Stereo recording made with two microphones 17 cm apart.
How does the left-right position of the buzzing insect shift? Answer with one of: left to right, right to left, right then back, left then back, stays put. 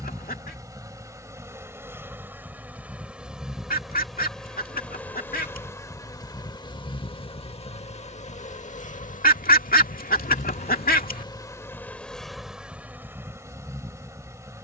left then back.